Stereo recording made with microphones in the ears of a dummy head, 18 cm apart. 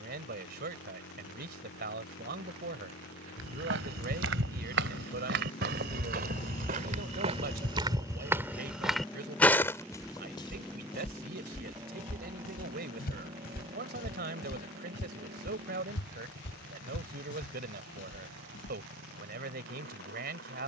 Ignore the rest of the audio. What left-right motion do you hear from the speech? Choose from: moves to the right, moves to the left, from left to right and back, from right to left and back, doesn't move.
doesn't move.